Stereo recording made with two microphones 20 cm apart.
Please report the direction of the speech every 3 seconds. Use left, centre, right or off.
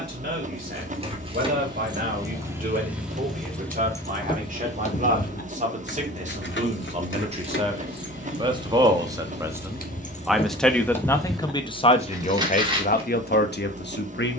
right, right, right, centre, left.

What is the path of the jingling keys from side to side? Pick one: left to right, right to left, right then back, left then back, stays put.
left then back.